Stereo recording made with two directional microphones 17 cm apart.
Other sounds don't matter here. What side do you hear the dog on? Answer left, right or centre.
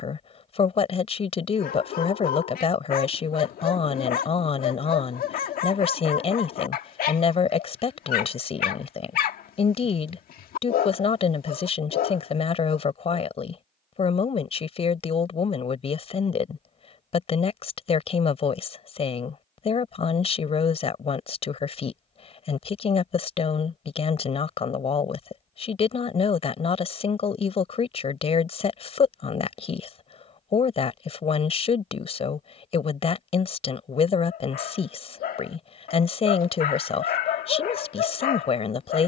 left.